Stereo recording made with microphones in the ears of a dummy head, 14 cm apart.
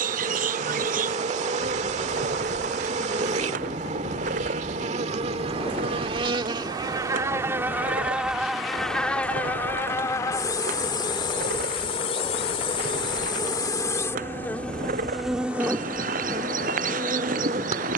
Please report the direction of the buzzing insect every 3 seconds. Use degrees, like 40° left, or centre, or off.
50° right, 40° right, 20° right, 20° left, 20° left, 20° right.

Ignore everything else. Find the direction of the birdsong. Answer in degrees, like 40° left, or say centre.
60° right.